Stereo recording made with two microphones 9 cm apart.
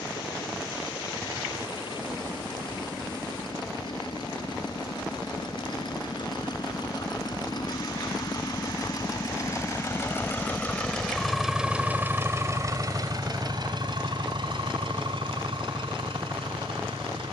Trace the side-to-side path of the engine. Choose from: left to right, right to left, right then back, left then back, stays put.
left to right.